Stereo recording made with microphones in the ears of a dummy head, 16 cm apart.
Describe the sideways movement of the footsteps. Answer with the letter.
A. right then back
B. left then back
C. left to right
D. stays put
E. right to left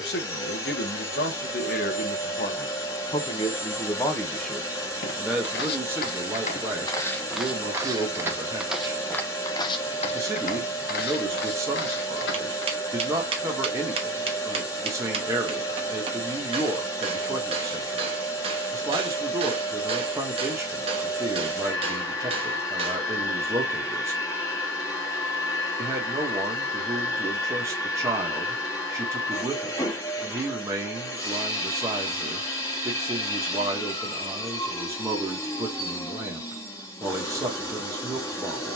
A.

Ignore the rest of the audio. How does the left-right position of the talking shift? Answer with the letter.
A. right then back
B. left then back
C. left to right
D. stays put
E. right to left
C.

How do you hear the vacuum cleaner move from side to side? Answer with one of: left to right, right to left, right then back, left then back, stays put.
stays put.